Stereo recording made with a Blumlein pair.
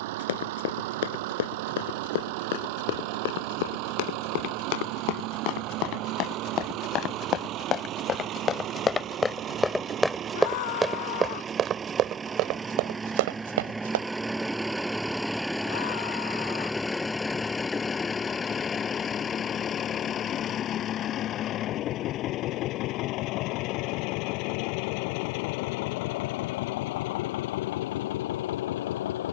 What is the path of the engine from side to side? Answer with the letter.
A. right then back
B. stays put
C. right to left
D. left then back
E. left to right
C.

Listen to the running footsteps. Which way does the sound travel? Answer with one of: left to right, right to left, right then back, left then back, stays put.
left to right.